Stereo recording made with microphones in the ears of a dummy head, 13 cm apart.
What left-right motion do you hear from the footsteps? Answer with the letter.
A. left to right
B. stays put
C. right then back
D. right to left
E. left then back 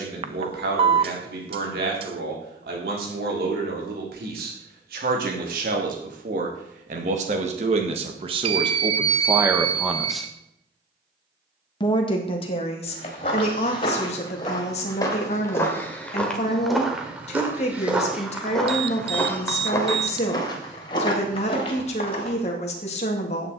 C.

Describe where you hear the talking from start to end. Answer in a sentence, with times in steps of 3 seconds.
You can hear the talking on the right from 0 s, in the centre from 9 s and on the left from 12 s.